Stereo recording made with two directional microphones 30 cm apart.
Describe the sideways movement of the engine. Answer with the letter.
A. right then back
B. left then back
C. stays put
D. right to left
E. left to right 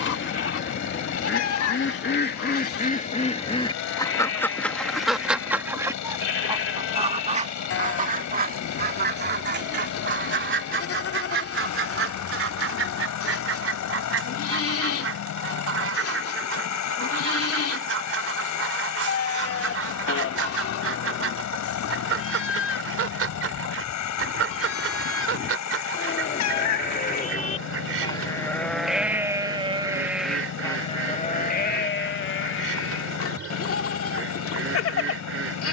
C.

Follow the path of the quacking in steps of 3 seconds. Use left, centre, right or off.
left, centre, right, right, right, right, right, right, right, right, right, right.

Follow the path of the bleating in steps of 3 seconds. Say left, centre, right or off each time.
left, left, left, left, left, left, left, left, left, centre, left, left.